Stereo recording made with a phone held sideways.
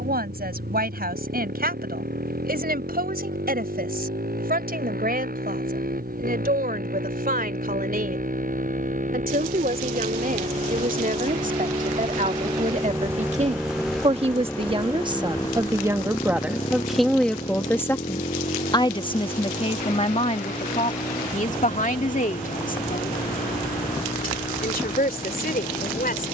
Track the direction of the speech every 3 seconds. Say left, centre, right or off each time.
right, right, right, right, right, centre, left, left, left.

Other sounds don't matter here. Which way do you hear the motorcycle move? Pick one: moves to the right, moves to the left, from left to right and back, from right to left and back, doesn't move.
moves to the left.